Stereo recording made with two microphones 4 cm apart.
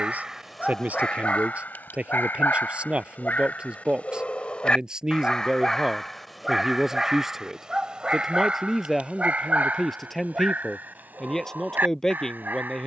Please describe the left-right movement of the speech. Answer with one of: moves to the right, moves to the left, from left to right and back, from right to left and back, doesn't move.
moves to the left.